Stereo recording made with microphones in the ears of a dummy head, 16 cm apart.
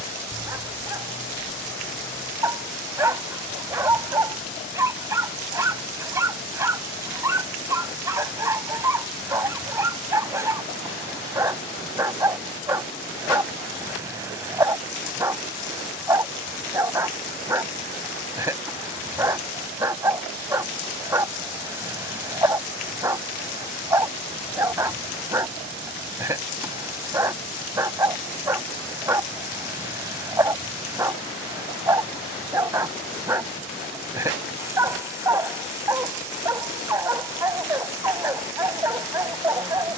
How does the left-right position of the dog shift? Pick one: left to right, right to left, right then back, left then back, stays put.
stays put.